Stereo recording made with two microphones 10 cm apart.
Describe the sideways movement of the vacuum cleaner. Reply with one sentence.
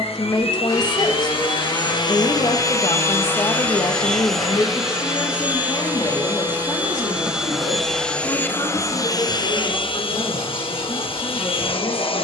You can hear the vacuum cleaner go right and come back.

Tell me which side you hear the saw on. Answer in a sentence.
You can hear the saw on the left.